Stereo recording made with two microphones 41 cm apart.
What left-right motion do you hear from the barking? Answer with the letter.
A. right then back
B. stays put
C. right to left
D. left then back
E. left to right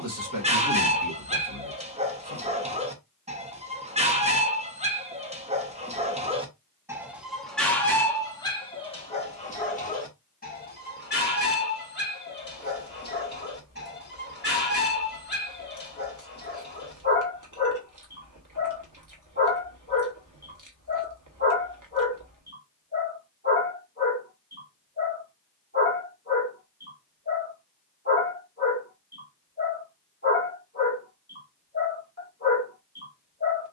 C.